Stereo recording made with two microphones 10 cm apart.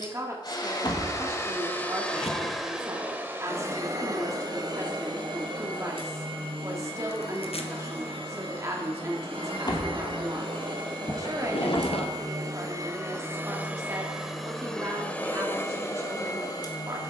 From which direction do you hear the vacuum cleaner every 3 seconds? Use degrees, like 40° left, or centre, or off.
20° left, 40° right, 70° right, 60° right, 20° right, 30° left.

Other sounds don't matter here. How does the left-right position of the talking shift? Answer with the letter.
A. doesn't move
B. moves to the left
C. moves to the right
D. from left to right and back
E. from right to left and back
A.